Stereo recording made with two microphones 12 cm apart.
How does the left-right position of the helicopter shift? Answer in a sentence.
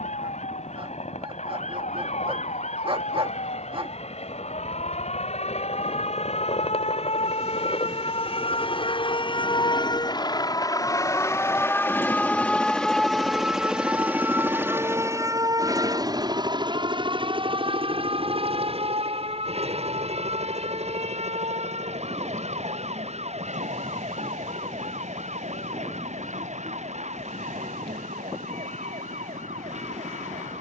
You can hear the helicopter go from the left side to the right.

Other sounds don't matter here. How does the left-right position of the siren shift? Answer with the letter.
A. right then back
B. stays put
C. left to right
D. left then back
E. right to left
C.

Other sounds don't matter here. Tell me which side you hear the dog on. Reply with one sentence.
You can hear the dog on the right.